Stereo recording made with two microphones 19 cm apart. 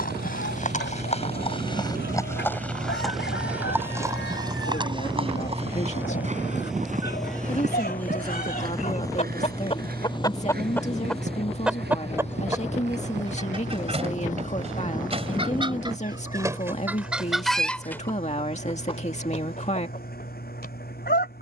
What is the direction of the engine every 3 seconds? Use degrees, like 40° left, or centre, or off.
50° right, 30° right, centre, 30° left, 40° left, 50° left, 50° left.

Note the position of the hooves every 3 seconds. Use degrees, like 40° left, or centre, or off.
30° left, 20° right, 40° right, 50° right, 60° right, off, off.